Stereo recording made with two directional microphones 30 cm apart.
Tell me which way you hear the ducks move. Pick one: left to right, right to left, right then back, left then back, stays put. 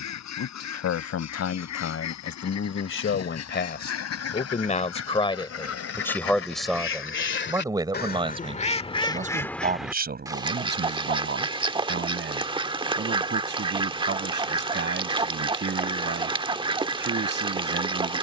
left to right.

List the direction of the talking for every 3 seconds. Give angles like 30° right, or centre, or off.
50° left, 30° left, 10° right, 30° right, 40° right, 40° right.